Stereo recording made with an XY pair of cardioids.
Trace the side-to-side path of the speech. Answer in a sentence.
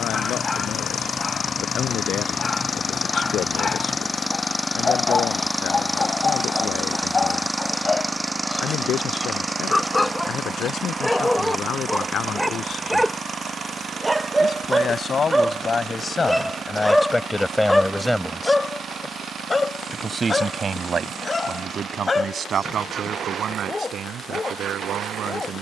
In this clip you hear the speech move from left to right.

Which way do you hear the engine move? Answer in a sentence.
In this clip you hear the engine move from left to right.